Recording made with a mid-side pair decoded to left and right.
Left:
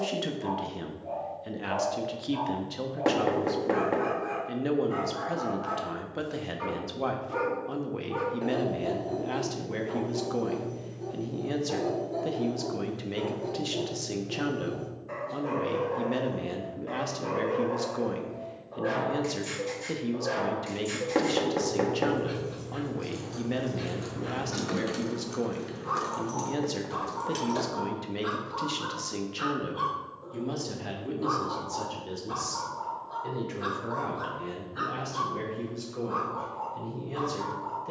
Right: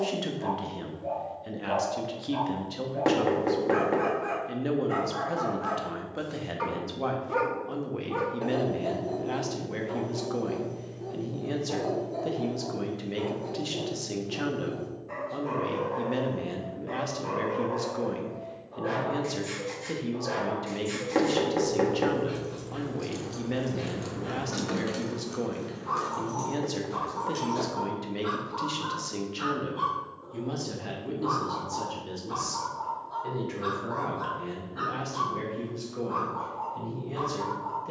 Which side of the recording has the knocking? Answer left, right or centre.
centre.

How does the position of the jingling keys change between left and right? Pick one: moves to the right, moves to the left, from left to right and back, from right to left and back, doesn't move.
moves to the left.